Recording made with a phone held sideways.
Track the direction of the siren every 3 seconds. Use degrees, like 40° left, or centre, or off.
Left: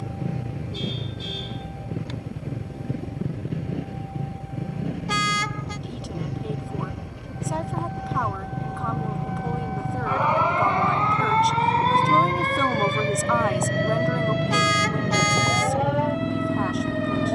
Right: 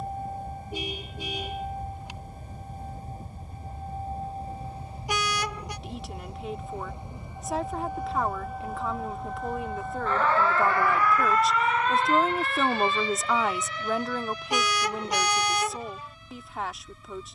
40° right, 30° right, 10° right, 20° left, 50° left, 70° left.